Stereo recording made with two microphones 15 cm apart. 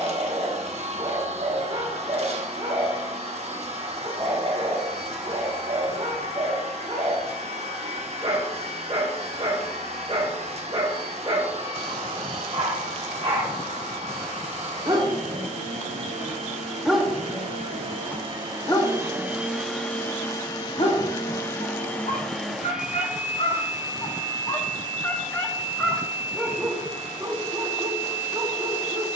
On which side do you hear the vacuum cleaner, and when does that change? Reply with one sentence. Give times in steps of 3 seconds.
You can hear the vacuum cleaner on the right from 0 s, in the centre from 18 s and on the right from 24 s.